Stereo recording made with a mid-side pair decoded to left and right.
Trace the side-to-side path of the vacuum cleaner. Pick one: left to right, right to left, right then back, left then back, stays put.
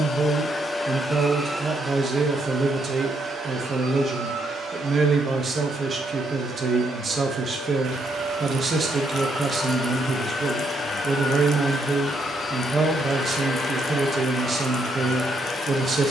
right then back.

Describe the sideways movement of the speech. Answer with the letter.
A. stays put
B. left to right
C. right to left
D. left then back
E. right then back
A.